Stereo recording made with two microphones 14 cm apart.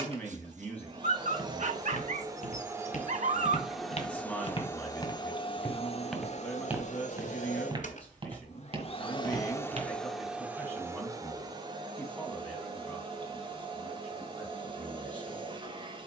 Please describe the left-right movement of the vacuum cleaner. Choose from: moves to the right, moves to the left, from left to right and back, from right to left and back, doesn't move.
from right to left and back.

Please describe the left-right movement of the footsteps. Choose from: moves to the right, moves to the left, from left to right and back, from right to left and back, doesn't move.
moves to the right.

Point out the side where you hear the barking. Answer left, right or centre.
right.